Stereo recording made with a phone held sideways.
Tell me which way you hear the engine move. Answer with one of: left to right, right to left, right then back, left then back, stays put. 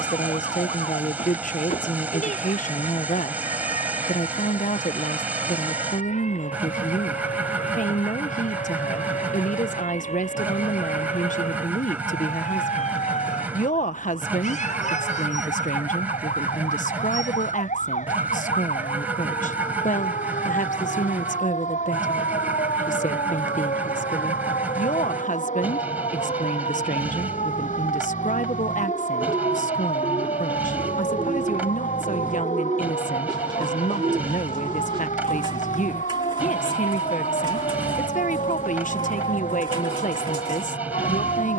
stays put.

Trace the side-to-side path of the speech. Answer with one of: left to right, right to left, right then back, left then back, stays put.
stays put.